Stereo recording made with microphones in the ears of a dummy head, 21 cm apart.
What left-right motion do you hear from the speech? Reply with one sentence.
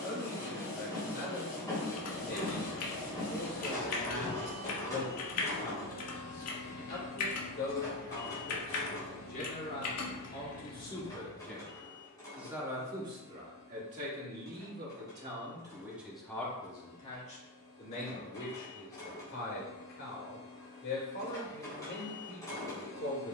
In this clip you hear the speech go right and come back.